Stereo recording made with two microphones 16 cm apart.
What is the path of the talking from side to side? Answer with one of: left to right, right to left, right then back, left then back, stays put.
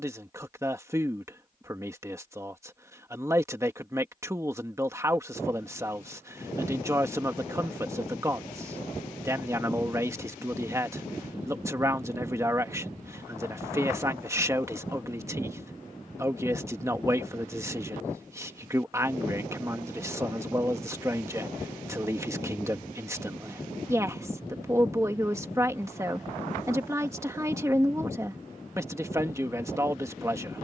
stays put.